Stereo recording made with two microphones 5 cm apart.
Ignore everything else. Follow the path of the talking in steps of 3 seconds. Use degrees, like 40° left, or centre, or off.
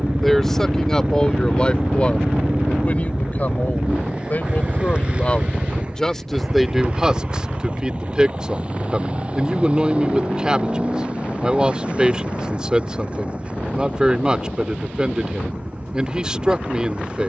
20° left, 30° left, 10° right, 20° right, 20° right, 20° right.